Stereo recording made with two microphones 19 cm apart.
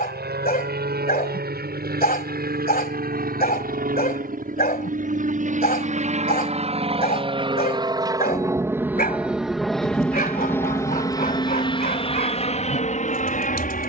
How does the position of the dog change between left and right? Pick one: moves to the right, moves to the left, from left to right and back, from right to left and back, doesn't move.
doesn't move.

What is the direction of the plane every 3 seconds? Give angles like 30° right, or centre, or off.
60° right, 50° right, 30° right, 10° left, 40° left.